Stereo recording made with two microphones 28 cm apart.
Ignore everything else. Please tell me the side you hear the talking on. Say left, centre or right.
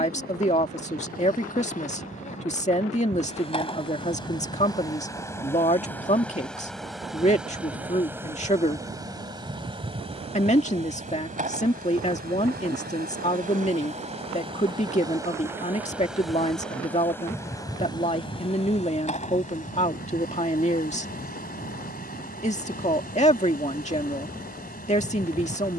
left.